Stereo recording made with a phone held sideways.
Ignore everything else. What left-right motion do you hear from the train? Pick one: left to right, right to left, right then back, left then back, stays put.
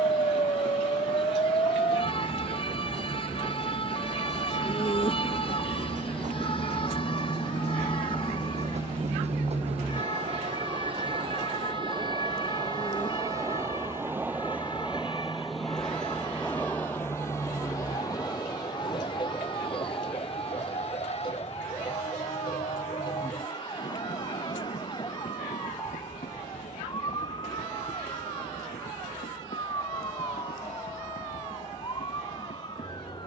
right to left.